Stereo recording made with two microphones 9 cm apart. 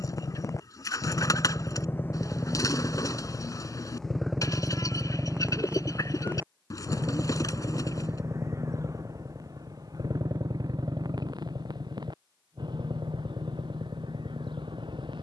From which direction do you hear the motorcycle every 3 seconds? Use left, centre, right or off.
left, centre, right, right, right.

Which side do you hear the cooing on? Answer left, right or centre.
left.